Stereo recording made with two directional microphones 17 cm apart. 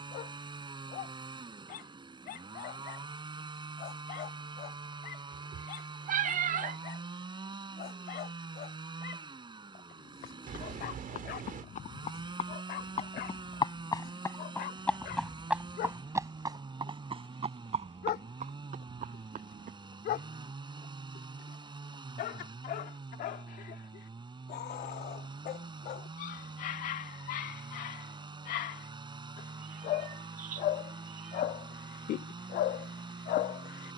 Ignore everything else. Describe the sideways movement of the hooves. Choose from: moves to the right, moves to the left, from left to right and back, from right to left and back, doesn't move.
moves to the right.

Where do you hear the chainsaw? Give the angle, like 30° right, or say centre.
30° right.